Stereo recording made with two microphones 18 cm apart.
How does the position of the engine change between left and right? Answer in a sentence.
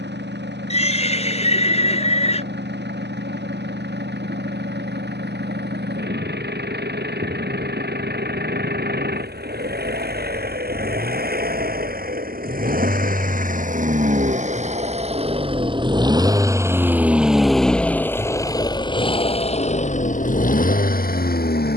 You can hear the engine move to the left.